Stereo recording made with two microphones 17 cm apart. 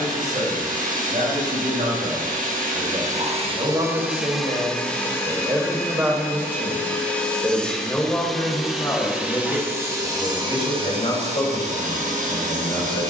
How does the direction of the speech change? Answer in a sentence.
In this clip you hear the speech travel towards the left.